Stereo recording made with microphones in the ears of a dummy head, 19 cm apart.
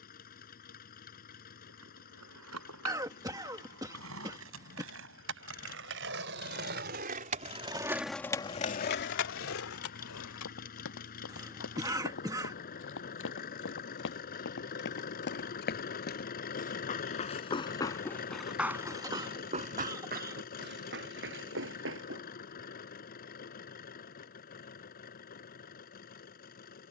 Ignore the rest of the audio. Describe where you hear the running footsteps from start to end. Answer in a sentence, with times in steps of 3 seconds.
In this clip you hear the running footsteps not at all from 0 s, on the left from 9 s, on the right from 18 s and not at all from 24 s.